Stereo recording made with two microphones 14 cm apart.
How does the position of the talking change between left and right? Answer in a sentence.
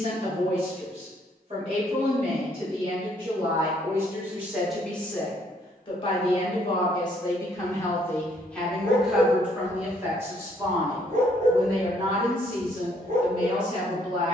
In this clip you hear the talking go left and come back.